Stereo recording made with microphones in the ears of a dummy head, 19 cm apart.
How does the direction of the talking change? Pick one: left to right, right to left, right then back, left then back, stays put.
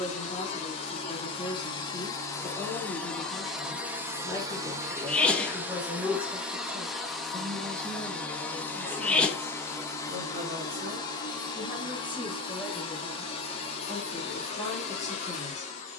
right then back.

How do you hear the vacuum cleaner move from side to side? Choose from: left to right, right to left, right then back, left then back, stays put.
right then back.